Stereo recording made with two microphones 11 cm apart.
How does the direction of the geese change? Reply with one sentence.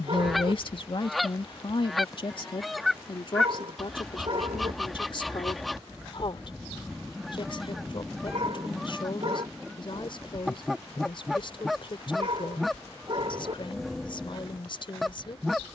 You can hear the geese stay put.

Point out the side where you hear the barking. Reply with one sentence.
You can hear the barking on the right.